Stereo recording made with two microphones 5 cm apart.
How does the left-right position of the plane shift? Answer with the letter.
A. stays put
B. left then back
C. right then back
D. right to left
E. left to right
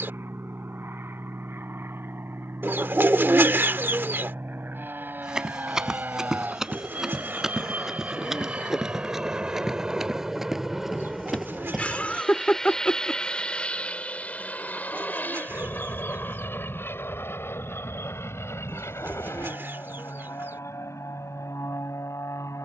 D.